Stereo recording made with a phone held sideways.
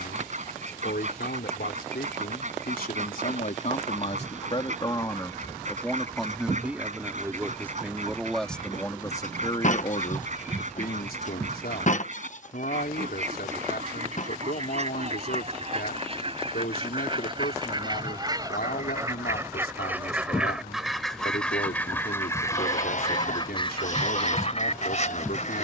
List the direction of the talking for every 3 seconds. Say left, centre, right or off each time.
left, left, centre, left, left, left, left, left, left.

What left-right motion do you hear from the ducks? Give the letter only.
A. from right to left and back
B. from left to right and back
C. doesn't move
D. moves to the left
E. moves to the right
D.